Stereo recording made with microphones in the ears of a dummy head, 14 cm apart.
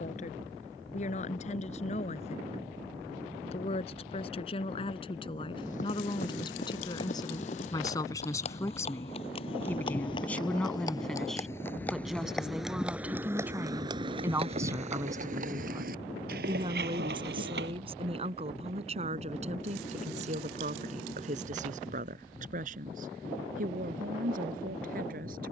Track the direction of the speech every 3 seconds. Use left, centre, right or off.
left, left, left, centre, centre, right, right, right, right.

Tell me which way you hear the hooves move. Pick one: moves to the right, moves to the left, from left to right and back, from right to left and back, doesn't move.
moves to the right.